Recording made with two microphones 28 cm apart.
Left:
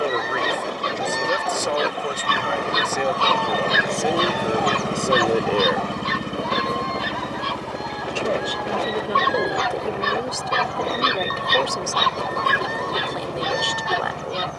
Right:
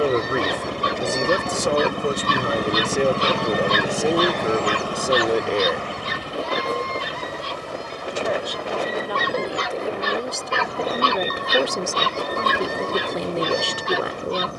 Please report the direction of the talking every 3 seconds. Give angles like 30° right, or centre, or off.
40° right, 20° right, 30° left, centre, 30° right.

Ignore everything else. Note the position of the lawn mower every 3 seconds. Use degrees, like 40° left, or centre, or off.
50° right, 10° left, 60° left, 80° left, 80° left.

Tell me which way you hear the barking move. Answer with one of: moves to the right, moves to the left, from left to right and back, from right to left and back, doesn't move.
from right to left and back.